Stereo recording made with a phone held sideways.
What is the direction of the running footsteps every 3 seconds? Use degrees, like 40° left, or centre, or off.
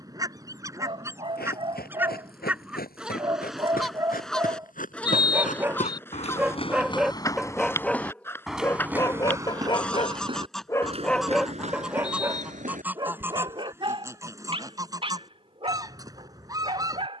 80° left, 60° left, 20° left, 30° right, 50° right, off.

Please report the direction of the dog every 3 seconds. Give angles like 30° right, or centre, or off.
30° right, 20° right, centre, 20° left, 30° right, 40° right.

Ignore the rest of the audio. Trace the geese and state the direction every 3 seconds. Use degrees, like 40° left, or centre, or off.
20° right, centre, 10° left, centre, 20° right, 20° right.